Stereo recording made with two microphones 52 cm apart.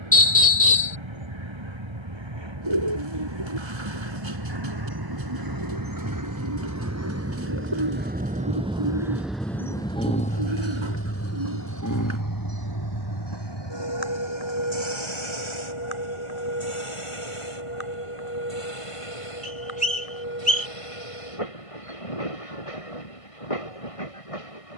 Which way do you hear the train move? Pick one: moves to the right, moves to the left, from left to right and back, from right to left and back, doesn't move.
moves to the left.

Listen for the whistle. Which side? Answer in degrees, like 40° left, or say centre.
10° left.